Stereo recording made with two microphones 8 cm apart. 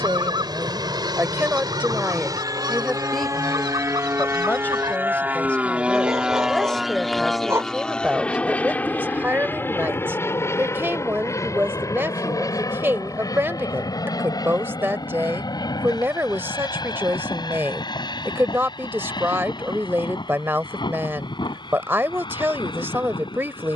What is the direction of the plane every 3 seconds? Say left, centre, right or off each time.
right, right, centre, left, left, left, left, left.